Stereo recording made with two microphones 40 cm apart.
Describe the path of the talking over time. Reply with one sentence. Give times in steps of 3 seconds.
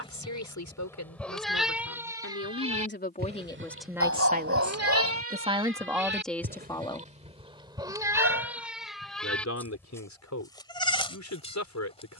You can hear the talking on the left from 0 s, in the centre from 3 s and on the left from 9 s.